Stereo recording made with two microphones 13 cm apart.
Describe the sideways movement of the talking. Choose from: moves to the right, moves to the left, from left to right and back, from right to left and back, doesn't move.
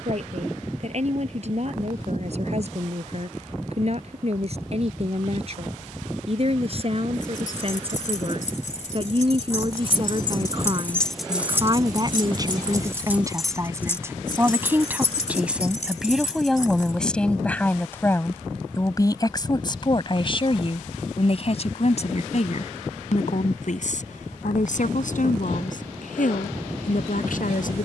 moves to the left.